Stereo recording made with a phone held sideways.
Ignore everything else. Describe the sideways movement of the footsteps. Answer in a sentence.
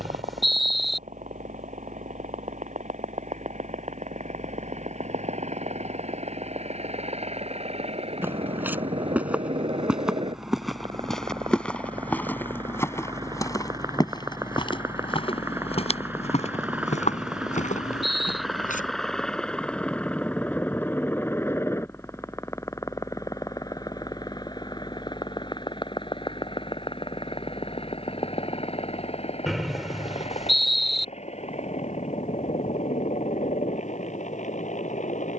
In this clip you hear the footsteps travel towards the left.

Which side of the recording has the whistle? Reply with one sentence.
You can hear the whistle in the centre.